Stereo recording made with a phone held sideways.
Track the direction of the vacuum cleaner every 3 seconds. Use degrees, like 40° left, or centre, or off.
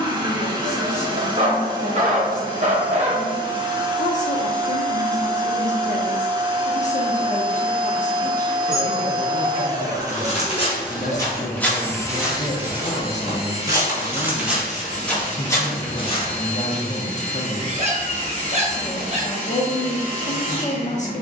30° right, 30° right, 30° right, 10° right, 30° left, 50° left, 50° left.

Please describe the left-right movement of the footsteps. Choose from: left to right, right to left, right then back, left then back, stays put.
right then back.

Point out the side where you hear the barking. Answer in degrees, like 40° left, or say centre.
40° right.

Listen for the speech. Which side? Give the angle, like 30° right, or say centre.
50° left.